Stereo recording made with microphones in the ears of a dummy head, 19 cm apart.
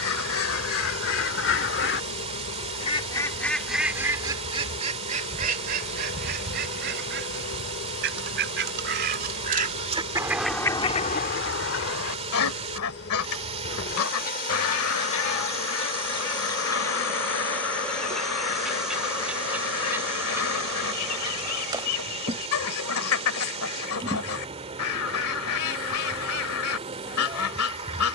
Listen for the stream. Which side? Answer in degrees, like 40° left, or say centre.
30° right.